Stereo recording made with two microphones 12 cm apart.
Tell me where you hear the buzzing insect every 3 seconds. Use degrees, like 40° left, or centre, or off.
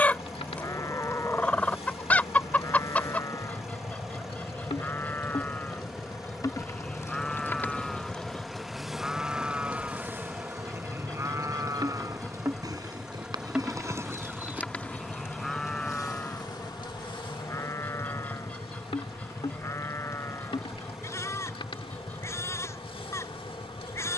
50° left, 50° left, 20° left, 20° right, 10° right, 30° left, 50° left, 50° left.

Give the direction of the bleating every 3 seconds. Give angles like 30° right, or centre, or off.
30° left, 20° left, centre, 20° right, 30° right, 10° left, 20° left, 20° left.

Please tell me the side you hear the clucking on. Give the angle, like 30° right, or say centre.
10° left.